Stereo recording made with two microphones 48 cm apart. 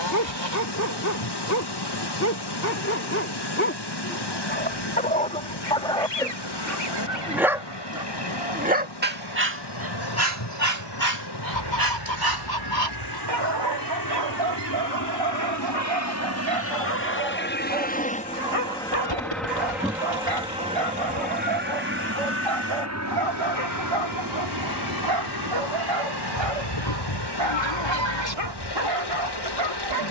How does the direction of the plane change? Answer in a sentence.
In this clip you hear the plane move to the right.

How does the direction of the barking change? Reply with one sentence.
You can hear the barking move to the right.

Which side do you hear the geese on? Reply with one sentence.
In this clip you hear the geese on the left.